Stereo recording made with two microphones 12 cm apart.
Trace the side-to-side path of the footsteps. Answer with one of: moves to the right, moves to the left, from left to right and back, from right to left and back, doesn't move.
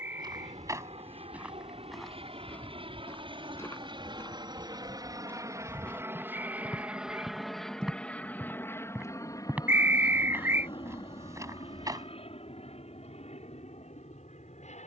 from right to left and back.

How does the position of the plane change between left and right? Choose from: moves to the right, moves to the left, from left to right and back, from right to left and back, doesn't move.
moves to the left.